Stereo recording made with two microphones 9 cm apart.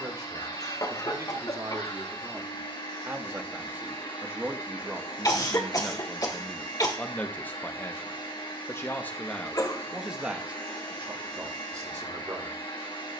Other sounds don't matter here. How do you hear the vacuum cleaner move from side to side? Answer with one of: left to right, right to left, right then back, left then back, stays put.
stays put.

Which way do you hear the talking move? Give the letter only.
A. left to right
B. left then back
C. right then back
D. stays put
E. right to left
B.